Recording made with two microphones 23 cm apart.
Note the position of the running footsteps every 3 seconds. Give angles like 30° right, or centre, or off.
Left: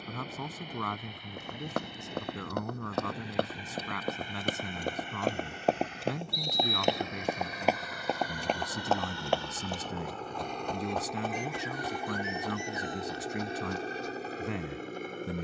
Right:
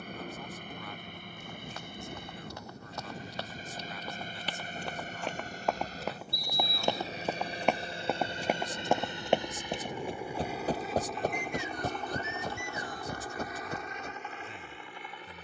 60° left, 50° left, 10° left, 30° right, 50° right.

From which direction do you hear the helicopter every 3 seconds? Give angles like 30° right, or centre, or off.
50° right, 40° right, 30° right, 10° right, 30° left.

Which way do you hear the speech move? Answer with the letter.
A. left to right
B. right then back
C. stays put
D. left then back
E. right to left
C.